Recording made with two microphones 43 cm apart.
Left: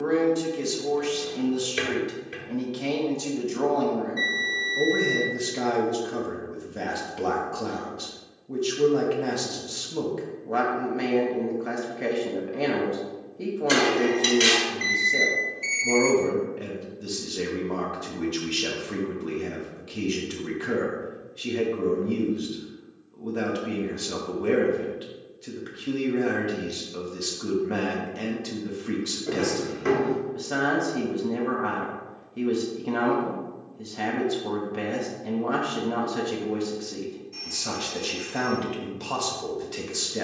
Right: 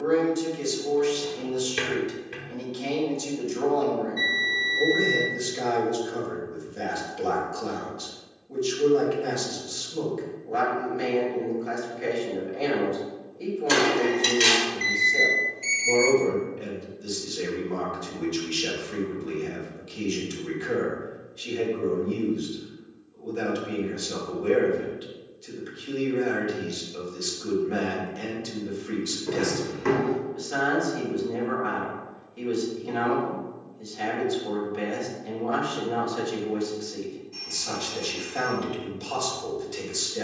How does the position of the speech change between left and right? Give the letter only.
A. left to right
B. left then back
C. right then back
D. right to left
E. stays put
E.